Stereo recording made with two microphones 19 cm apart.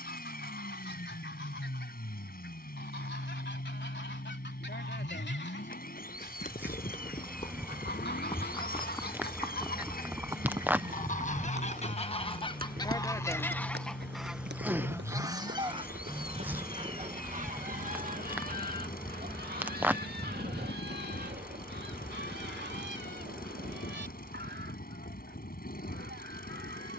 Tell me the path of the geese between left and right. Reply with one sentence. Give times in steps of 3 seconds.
In this clip you hear the geese on the left from 0 s, in the centre from 12 s and on the right from 15 s.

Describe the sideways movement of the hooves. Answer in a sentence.
In this clip you hear the hooves move to the right.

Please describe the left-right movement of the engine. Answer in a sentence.
You can hear the engine stay in one place.